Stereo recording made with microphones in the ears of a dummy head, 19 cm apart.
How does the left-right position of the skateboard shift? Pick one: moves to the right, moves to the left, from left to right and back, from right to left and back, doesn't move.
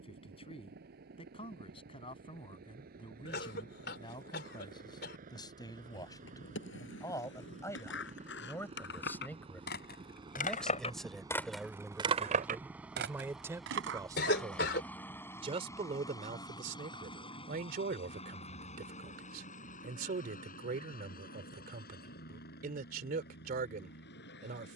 moves to the right.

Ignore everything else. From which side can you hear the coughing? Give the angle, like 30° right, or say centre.
50° left.